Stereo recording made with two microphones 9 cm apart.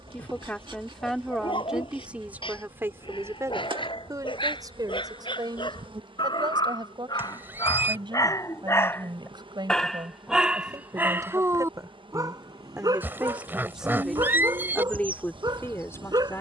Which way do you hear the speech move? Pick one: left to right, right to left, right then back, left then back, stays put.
right then back.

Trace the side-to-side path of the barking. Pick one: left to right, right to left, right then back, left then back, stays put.
left to right.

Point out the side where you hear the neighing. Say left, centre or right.
right.